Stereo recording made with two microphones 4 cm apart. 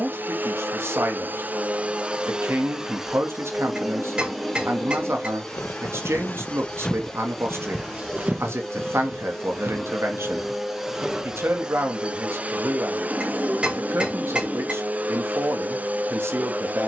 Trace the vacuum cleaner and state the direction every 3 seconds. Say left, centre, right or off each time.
right, centre, centre, centre, right, right.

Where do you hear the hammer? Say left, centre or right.
right.